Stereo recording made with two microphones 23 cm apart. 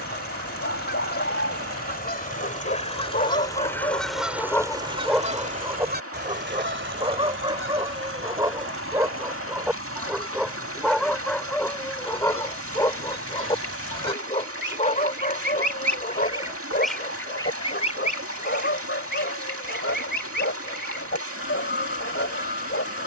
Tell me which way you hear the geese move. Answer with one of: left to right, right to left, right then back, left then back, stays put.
right then back.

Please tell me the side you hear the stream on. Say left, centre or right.
right.